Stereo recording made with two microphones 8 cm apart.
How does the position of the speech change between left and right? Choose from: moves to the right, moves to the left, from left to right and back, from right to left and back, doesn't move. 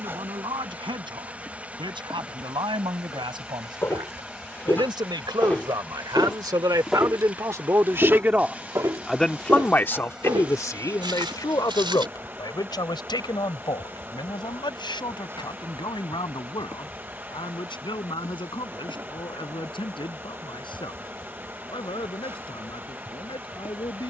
moves to the left.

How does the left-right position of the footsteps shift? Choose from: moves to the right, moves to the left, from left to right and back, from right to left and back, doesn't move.
moves to the right.